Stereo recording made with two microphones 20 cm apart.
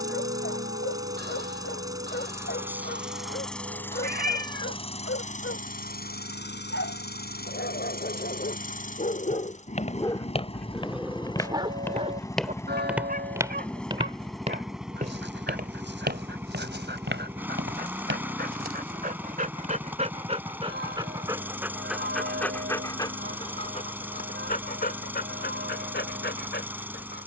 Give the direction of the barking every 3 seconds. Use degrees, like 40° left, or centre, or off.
70° left, 70° left, 60° left, 10° left, 50° right, 60° right, 40° right, 10° left, 50° left.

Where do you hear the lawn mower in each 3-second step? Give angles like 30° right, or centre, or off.
20° right, 20° left, 50° left, 30° left, 10° left, 10° right, 10° right, 10° right, 10° right.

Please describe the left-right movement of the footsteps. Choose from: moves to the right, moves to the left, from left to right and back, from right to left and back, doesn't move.
moves to the right.